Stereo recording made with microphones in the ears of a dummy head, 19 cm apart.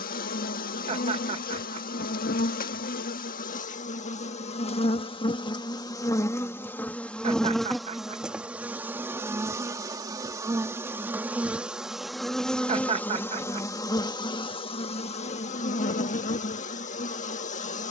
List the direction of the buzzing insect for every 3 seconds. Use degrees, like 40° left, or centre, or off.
40° left, 30° left, centre, 10° right, 10° left, 40° left.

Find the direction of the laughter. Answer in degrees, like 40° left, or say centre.
30° right.